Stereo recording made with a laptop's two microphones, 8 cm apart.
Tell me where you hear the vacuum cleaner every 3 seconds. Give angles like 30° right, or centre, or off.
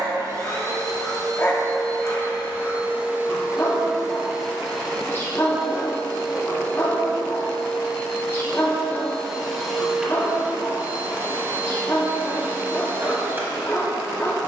40° right, centre, 10° left, 10° right, 30° right.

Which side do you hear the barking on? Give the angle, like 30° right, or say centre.
30° left.